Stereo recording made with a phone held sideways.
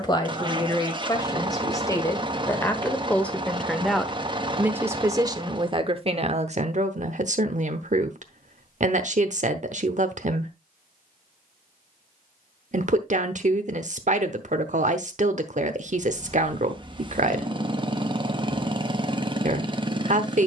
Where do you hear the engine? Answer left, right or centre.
right.